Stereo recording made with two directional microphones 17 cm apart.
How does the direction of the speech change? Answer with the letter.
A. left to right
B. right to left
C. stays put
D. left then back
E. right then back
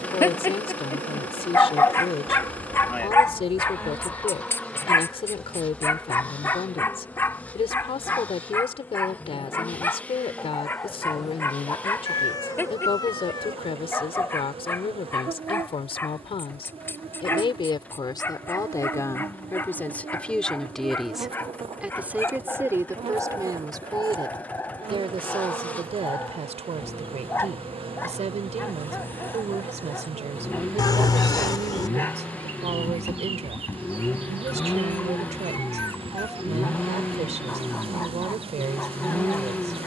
A.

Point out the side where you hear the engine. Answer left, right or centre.
centre.